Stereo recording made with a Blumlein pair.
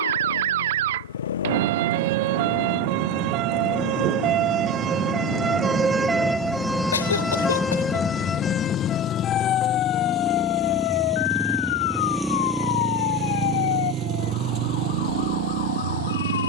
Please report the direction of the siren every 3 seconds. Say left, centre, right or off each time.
right, right, centre, left, left, left.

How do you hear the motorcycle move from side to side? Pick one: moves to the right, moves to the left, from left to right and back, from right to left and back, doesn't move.
moves to the right.